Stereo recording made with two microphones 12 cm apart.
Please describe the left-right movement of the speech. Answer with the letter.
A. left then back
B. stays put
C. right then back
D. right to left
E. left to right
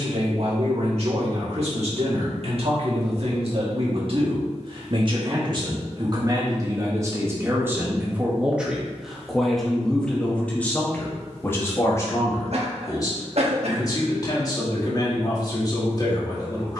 D.